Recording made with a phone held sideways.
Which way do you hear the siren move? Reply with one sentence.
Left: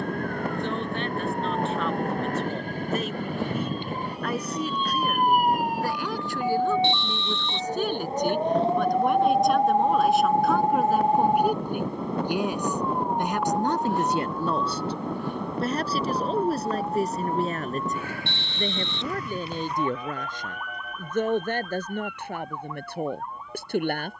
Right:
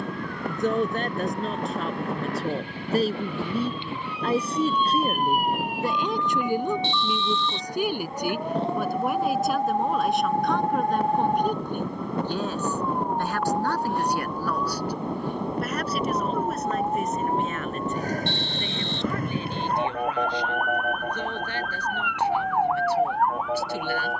You can hear the siren travel towards the right.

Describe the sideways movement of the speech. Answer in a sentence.
In this clip you hear the speech move to the left.